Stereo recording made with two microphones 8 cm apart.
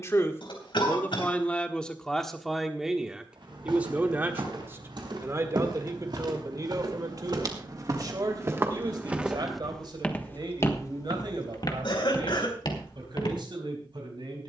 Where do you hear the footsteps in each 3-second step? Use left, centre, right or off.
off, right, right, left, left.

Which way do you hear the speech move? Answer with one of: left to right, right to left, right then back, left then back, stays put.
left to right.